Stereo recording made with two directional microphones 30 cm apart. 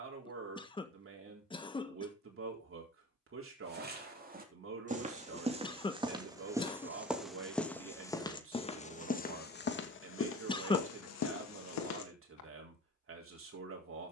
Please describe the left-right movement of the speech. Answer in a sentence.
You can hear the speech stay put.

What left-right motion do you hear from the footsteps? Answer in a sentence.
In this clip you hear the footsteps travel towards the left.